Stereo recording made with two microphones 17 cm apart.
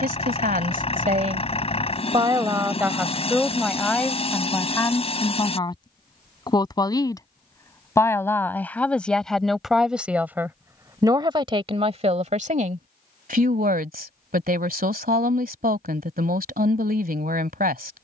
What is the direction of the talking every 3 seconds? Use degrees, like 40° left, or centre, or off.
40° right, 10° left, 20° left, 10° right, 60° right, 60° right.